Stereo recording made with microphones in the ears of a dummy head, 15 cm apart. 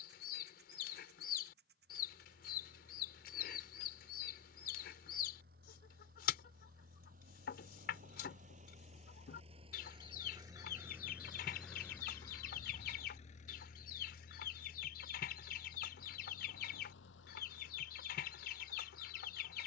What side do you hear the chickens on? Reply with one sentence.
In this clip you hear the chickens on the left.